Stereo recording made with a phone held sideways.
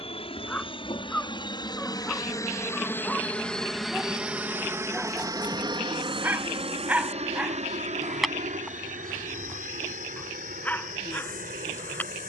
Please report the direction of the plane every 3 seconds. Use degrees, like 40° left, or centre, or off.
40° left, 10° right, 50° right, 70° right.